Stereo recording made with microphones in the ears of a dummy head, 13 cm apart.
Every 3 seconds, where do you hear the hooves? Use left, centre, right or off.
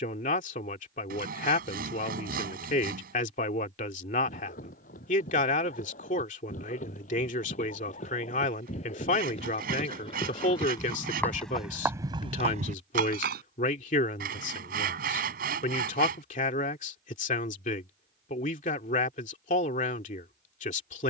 off, left, left, left, right, off, off.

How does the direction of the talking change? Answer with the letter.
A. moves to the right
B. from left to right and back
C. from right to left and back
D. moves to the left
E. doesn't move
E.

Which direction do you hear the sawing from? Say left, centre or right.
right.